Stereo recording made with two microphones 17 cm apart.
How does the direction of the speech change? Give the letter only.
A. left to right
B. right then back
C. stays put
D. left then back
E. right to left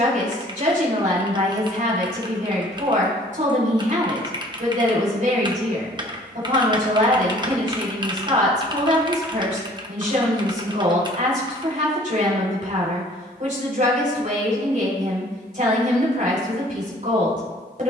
C.